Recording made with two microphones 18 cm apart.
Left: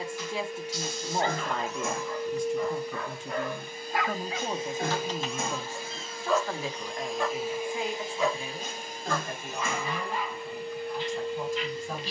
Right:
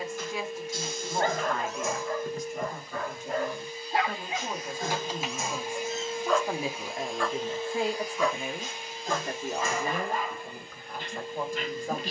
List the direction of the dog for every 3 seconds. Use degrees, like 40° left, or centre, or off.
50° right, 30° right, 20° left, 50° right.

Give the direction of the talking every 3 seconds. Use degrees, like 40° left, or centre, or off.
30° left, 20° left, 30° right, 60° right.